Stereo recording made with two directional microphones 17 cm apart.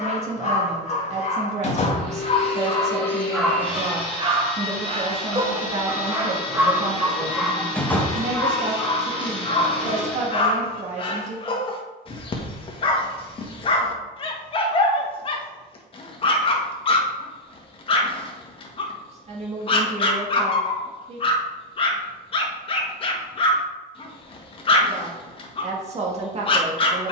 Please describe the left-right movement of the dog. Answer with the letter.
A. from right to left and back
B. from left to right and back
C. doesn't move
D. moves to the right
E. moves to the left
B.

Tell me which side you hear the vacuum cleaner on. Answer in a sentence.
You can hear the vacuum cleaner on the left.